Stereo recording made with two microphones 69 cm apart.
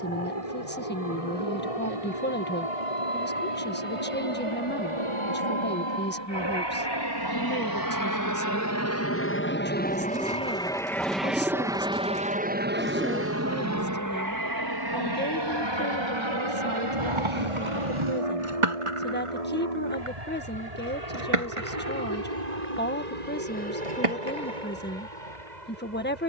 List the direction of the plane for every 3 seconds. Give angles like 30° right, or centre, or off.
60° left, 50° left, 30° left, 10° left, 20° right, 40° right, 50° right, 60° right, 70° right.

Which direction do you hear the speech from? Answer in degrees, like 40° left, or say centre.
10° left.